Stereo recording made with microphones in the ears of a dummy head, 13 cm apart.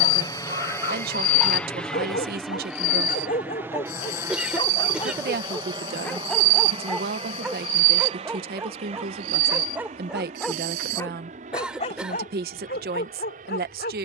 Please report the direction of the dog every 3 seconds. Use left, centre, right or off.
left, left, centre, centre, left.